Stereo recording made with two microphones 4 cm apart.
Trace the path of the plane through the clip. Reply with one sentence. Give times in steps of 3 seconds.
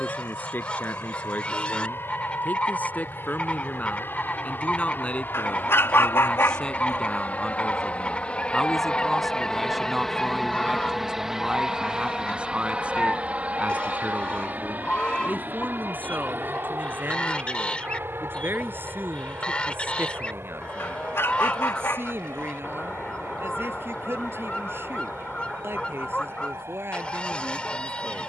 In this clip you hear the plane on the left from 0 s, in the centre from 9 s and on the right from 12 s.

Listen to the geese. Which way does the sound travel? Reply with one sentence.
In this clip you hear the geese stay put.